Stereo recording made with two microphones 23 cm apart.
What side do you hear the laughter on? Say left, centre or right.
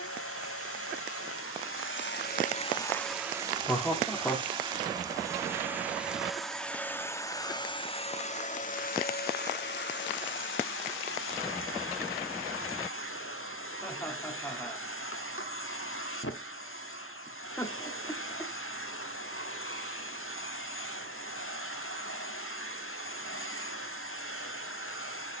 centre.